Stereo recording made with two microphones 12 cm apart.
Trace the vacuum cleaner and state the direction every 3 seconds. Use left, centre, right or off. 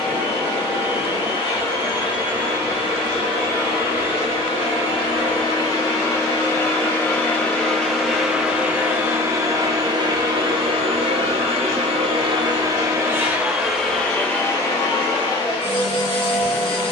left, left, centre, right, centre, left.